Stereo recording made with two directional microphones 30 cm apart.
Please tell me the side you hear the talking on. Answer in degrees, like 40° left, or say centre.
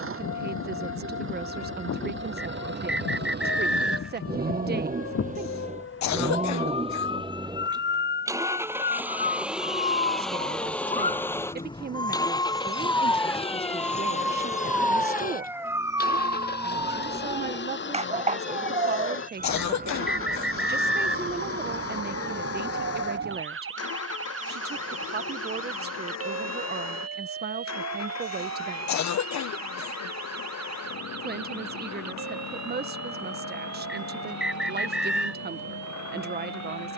30° right.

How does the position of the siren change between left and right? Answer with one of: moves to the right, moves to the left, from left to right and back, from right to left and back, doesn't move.
moves to the right.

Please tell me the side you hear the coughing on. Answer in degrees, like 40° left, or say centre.
60° left.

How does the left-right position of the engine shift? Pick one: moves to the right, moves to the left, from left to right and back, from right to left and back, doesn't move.
moves to the left.